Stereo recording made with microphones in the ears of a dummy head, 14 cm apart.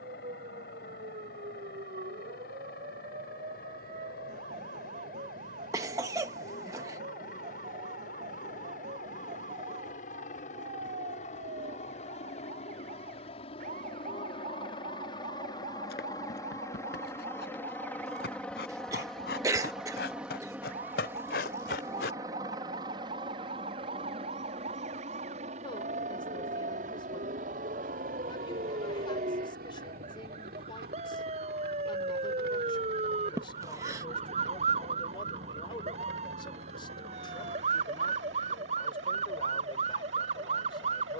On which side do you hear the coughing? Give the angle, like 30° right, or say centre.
20° right.